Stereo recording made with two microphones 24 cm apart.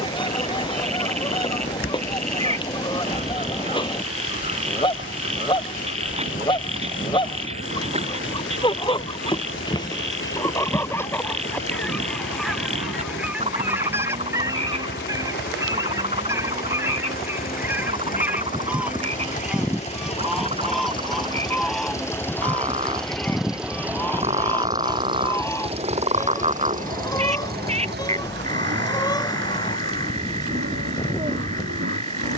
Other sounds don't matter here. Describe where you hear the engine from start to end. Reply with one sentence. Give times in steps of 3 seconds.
You can hear the engine not at all from 0 s, on the left from 3 s, in the centre from 21 s and on the right from 24 s.